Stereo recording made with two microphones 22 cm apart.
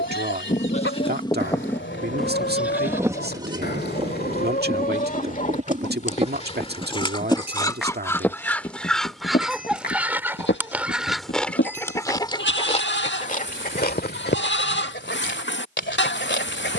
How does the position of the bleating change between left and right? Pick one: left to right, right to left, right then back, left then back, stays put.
right then back.